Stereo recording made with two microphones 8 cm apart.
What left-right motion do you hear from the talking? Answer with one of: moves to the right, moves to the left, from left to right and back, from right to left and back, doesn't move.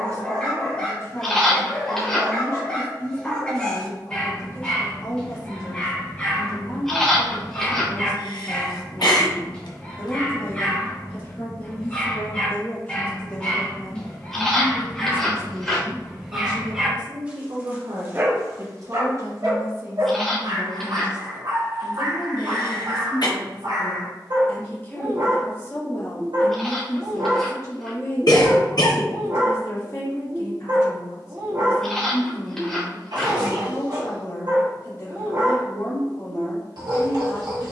from left to right and back.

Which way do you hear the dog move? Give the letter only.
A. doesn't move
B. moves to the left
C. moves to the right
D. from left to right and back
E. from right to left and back
C.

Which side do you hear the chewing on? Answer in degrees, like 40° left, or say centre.
10° left.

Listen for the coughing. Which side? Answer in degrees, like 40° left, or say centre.
60° left.